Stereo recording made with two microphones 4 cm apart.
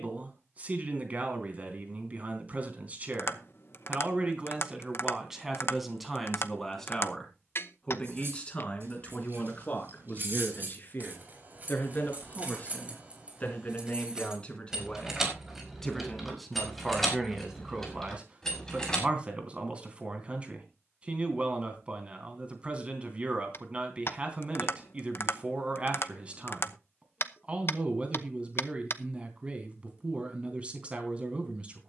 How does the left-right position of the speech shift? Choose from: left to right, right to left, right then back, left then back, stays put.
left then back.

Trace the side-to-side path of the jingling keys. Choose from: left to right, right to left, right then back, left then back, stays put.
right to left.